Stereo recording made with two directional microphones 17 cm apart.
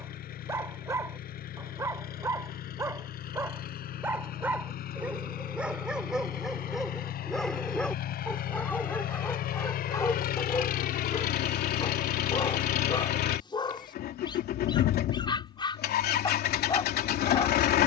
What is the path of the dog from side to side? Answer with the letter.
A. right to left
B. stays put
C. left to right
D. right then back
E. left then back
A.